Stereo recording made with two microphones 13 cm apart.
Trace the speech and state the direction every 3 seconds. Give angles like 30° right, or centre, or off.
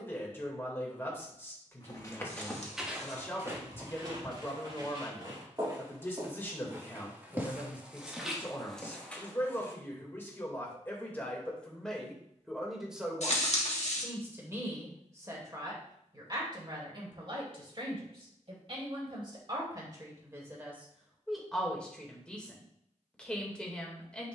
20° left, 20° left, 20° left, 10° left, 10° right, 40° right, 30° right, 10° left.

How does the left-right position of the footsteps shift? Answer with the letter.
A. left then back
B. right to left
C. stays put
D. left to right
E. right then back
E.